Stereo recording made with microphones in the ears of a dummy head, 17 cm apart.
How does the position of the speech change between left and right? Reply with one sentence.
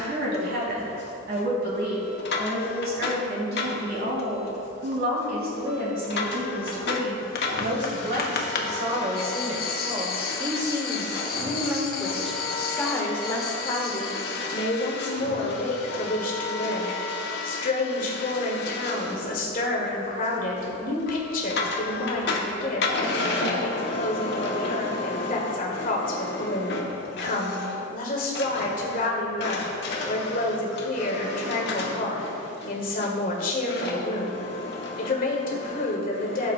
In this clip you hear the speech travel towards the left.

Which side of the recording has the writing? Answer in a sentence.
In this clip you hear the writing on the left.